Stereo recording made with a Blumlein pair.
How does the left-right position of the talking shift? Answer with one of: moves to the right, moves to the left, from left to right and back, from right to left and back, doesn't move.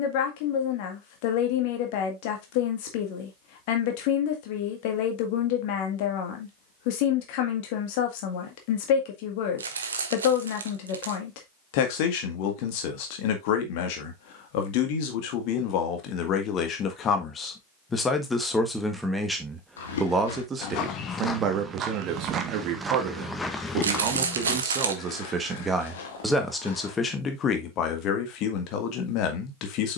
from left to right and back.